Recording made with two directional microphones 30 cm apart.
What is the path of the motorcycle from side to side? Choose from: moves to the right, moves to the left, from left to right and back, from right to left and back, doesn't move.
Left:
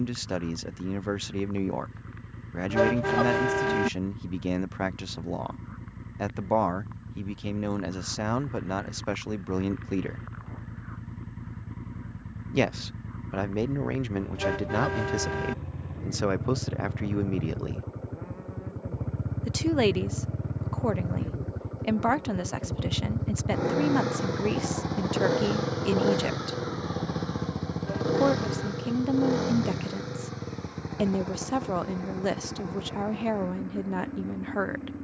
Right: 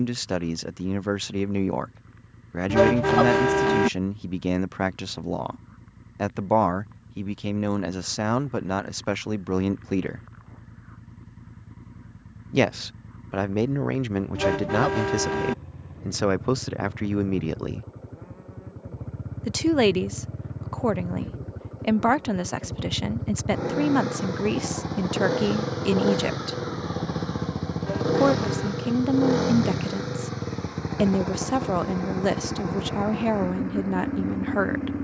moves to the right.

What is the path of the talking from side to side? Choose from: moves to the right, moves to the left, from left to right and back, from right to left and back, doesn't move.
doesn't move.